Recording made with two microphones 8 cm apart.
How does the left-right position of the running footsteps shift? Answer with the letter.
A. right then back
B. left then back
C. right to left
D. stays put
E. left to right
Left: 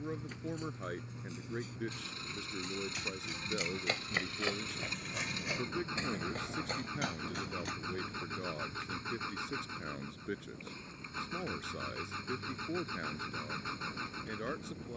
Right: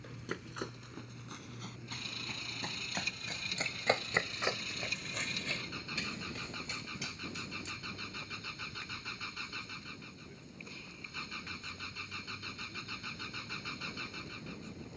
C.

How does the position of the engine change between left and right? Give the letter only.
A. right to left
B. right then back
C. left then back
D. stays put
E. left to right
D.